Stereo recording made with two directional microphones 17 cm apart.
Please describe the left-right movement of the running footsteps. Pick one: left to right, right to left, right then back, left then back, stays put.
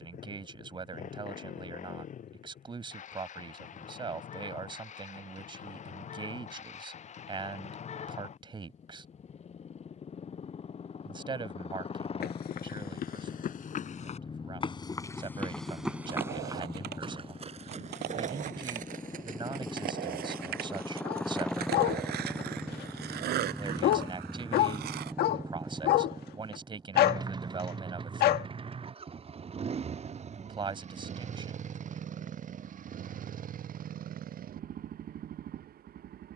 left to right.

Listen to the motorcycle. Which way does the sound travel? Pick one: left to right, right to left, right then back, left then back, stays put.
left to right.